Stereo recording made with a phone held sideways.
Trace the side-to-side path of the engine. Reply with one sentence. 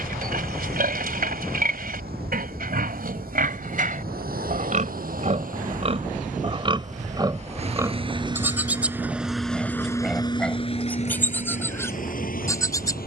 You can hear the engine go from the right side to the left.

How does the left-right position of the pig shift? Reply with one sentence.
In this clip you hear the pig travel towards the left.